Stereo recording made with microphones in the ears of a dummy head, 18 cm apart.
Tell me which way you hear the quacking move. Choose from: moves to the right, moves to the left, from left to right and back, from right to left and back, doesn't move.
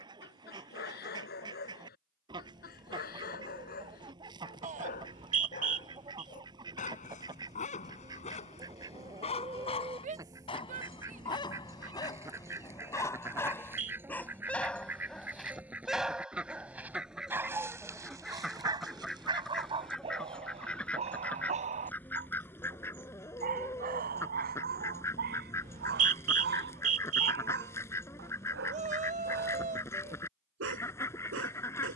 moves to the left.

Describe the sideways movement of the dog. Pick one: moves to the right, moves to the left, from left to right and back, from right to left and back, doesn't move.
moves to the right.